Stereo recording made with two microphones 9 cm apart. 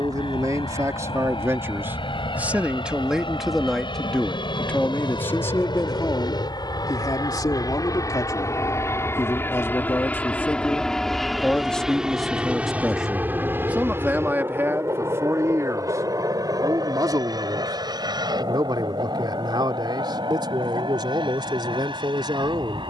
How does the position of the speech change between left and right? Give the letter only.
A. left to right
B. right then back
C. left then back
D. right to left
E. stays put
C.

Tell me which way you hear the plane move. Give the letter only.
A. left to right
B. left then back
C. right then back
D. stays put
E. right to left
A.